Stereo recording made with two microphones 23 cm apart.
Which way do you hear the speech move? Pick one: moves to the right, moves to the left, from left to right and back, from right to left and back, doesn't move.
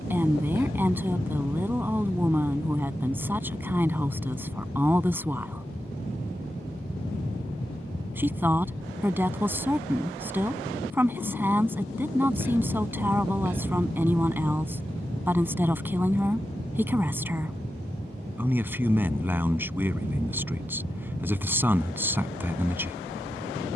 doesn't move.